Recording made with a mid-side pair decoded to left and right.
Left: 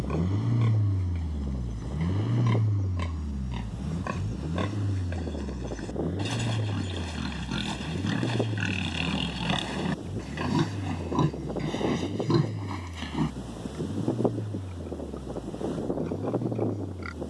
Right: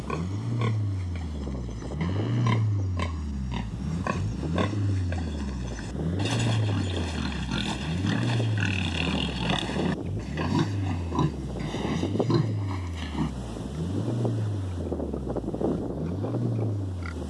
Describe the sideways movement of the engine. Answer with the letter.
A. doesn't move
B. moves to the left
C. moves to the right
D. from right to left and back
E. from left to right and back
C.